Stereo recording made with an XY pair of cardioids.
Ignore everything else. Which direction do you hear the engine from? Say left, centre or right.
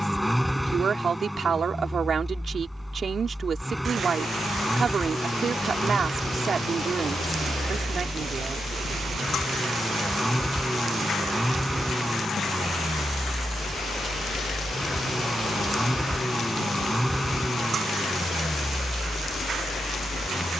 centre.